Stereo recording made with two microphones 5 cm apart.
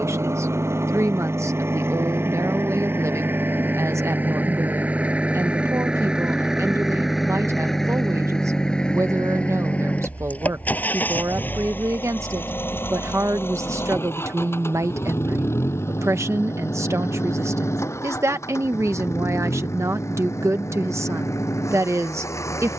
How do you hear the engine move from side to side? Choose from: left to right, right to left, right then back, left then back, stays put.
right to left.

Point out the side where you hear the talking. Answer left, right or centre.
right.